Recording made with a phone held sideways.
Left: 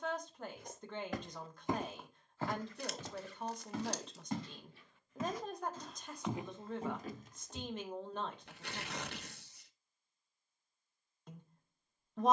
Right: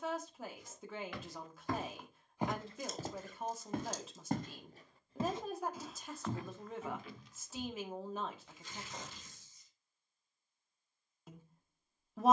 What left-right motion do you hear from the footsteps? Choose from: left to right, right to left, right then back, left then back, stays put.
right then back.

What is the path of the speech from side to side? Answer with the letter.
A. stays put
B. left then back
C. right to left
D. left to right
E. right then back
A.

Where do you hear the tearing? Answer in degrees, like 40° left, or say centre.
70° left.